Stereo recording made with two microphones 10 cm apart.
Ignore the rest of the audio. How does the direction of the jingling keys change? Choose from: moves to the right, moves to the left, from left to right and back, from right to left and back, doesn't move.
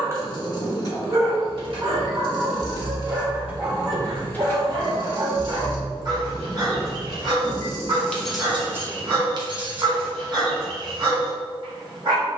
from right to left and back.